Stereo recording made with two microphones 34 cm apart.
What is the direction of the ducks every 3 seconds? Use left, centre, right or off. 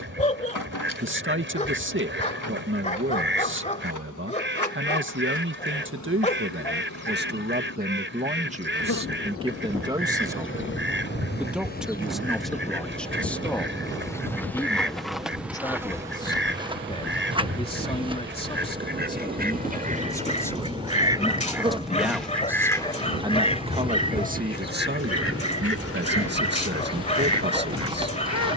right, right, right, right, right, right, right, centre, left, left.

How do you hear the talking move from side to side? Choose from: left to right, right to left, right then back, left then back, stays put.
left then back.